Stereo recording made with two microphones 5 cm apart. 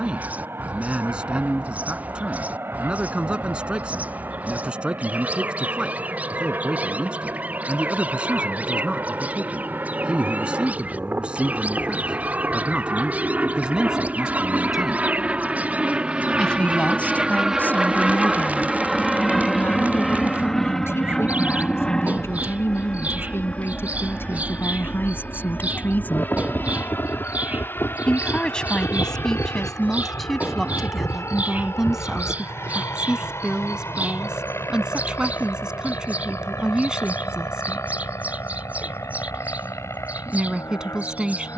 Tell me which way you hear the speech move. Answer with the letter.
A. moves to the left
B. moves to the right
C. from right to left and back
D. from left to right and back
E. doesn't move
C.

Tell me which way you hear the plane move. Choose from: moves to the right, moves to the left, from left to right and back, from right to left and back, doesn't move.
moves to the left.